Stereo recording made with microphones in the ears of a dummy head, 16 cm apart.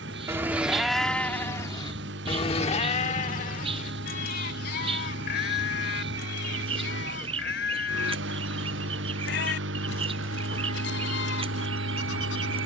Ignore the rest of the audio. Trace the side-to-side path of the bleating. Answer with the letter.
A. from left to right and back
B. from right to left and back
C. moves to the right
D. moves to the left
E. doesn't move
D.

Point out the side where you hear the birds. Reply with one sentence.
In this clip you hear the birds on the right.